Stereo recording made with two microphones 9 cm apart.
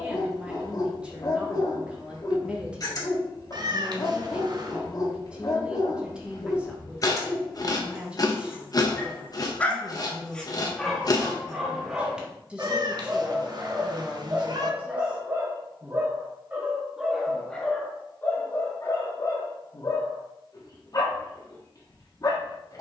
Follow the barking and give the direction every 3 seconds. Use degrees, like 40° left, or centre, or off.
40° left, 40° left, 40° left, centre, 20° right, 10° right, 40° left, 40° left.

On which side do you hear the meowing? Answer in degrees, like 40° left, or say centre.
50° right.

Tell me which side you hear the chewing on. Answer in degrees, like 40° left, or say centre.
40° left.